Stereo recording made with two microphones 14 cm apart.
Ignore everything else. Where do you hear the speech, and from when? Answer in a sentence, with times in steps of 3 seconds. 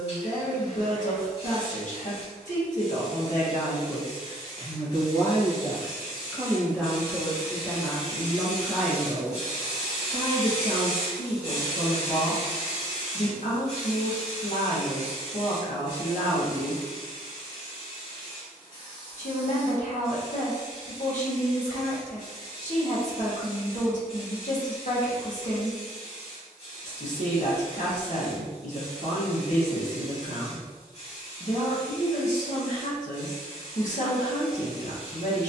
You can hear the speech on the left from 0 s, in the centre from 6 s and on the left from 9 s.